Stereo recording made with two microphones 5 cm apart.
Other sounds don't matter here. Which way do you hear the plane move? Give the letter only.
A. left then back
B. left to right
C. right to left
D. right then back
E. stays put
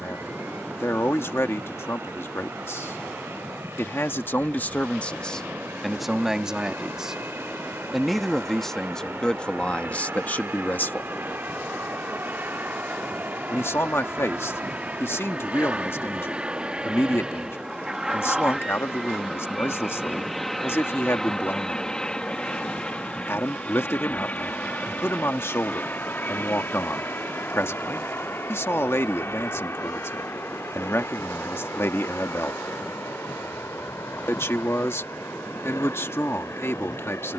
C.